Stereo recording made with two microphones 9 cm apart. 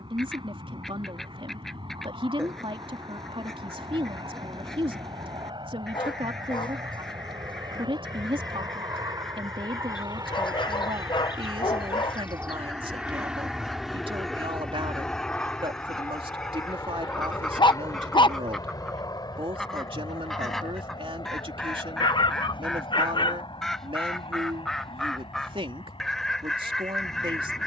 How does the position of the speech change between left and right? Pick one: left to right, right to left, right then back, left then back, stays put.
stays put.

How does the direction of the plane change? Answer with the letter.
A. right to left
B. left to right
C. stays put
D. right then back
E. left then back
A.